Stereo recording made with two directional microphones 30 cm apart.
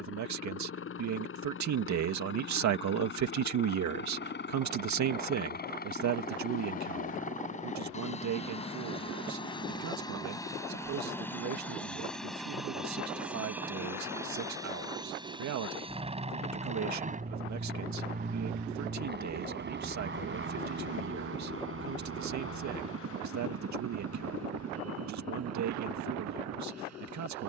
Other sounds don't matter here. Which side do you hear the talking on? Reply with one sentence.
You can hear the talking on the right.